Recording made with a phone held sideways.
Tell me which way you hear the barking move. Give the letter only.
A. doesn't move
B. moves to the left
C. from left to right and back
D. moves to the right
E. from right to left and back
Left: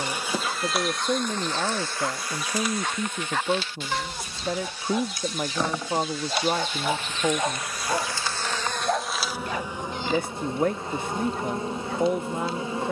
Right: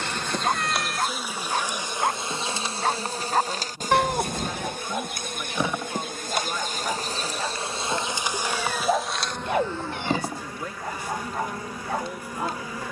E.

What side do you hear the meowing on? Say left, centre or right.
right.